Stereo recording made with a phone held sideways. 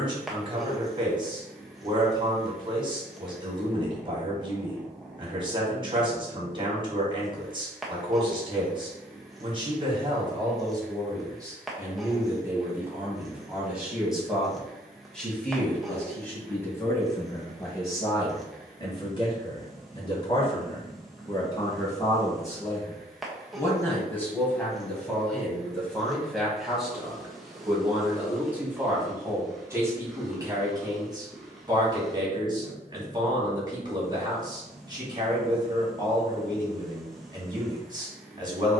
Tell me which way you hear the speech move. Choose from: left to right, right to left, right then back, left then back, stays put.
left then back.